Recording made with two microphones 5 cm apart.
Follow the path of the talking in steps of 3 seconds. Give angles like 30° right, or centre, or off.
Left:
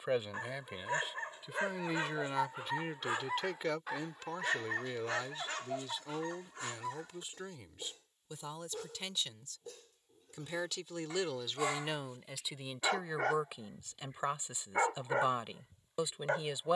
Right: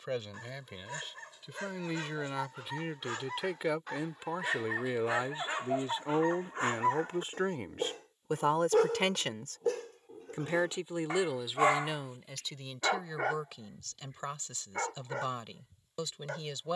10° left, 20° right, 50° right, 30° right, 10° left, 20° left.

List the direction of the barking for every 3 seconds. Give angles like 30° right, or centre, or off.
30° left, centre, 50° right, 60° right, centre, 30° left.